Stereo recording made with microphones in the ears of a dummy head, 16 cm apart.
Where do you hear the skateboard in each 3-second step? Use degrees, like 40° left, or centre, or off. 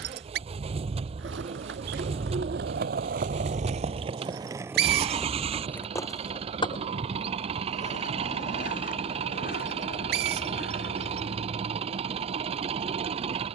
70° right, 20° right, 40° left, 50° left, off.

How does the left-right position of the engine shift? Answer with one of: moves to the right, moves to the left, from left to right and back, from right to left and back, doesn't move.
doesn't move.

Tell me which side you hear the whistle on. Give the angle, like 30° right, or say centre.
60° right.